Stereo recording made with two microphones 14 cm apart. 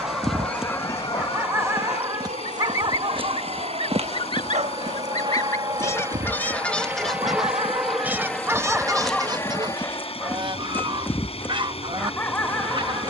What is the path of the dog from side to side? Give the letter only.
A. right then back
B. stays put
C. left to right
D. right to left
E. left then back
A.